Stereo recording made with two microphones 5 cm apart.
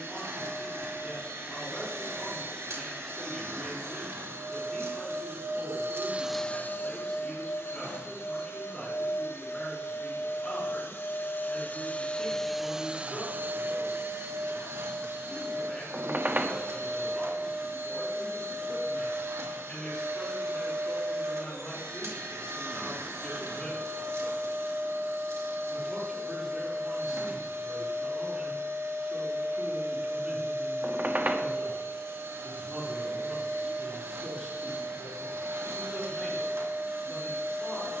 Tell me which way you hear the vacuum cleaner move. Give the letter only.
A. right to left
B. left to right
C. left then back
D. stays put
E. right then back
C.